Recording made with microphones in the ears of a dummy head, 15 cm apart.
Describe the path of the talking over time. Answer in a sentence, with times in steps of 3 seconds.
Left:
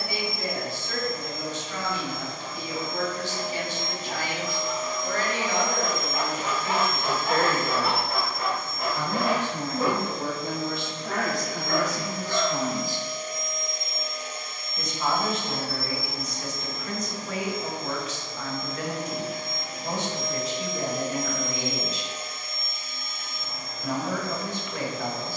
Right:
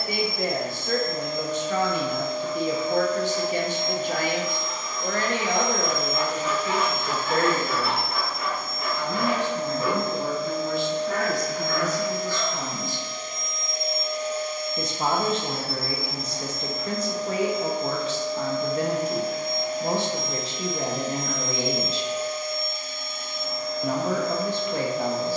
You can hear the talking on the right from 0 s, in the centre from 6 s, on the left from 9 s and on the right from 15 s.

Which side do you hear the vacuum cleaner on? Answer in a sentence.
In this clip you hear the vacuum cleaner on the right.